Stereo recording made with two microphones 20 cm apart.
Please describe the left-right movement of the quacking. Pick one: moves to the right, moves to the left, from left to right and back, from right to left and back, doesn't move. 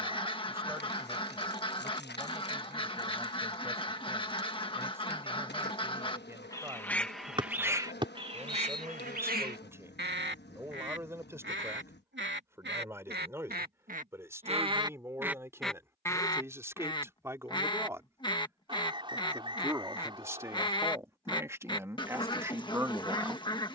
from left to right and back.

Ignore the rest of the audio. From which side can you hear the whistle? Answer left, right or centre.
right.